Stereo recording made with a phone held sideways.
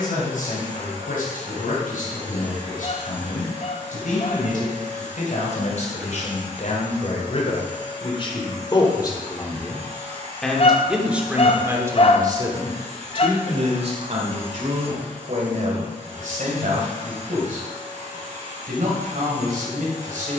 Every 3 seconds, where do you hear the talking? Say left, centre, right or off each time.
left, left, left, centre, right, right, right.